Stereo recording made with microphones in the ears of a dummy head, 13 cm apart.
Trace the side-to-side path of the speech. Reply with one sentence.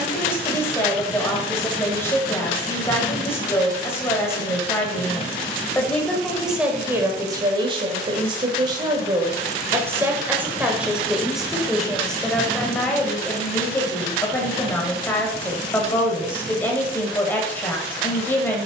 You can hear the speech move from left to right and back again.